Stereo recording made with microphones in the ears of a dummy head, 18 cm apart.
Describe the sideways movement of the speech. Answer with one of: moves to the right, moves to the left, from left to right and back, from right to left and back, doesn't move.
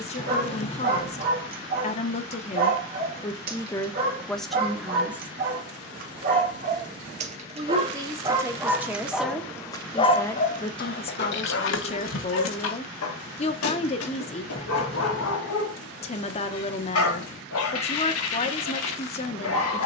from left to right and back.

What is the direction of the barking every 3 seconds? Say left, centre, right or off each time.
right, right, right, left, left, left, left.